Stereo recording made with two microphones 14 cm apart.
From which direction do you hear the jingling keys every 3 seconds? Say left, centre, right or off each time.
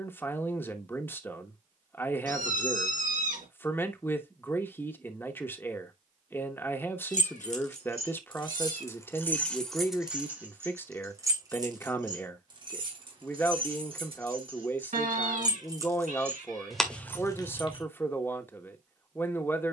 off, off, left, centre, right, centre, off.